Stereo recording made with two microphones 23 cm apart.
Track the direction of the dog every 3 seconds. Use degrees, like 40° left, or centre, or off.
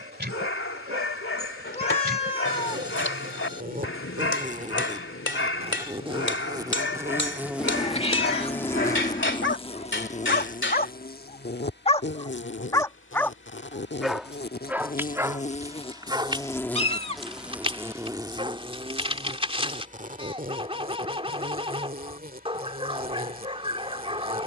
70° left, 70° left, 70° left, 50° left, centre, 20° right, 30° right, 30° right.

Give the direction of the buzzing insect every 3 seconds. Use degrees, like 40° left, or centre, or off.
50° right, 30° right, 10° right, 40° left, 50° left, 10° left, 30° right, 40° right.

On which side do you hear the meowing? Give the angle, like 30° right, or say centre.
30° left.